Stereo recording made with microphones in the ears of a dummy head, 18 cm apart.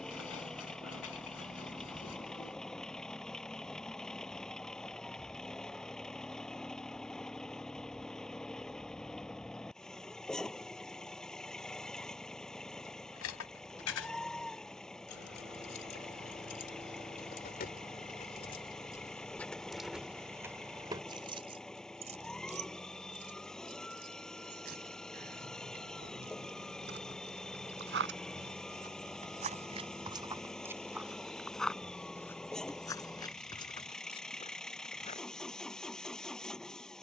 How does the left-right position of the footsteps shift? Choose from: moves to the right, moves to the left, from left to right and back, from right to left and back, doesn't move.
moves to the left.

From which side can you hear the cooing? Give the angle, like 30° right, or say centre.
80° left.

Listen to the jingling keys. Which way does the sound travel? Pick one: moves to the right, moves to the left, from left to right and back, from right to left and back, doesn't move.
moves to the right.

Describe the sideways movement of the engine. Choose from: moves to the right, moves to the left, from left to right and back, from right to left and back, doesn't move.
doesn't move.